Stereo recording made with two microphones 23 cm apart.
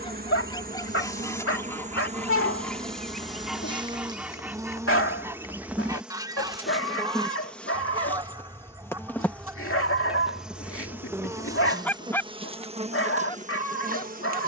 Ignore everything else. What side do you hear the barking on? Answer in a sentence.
In this clip you hear the barking on the left.